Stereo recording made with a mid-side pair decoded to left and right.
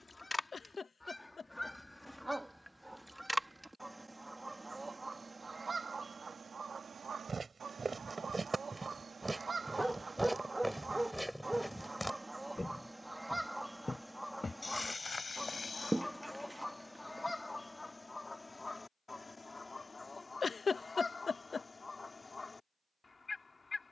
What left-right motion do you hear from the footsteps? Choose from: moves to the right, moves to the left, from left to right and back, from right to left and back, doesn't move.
moves to the left.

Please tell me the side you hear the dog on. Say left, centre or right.
centre.